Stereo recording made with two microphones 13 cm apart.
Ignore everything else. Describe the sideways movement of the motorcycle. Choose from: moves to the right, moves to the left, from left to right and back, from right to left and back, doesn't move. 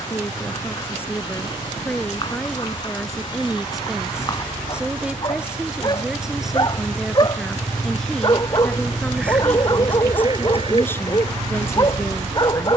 moves to the right.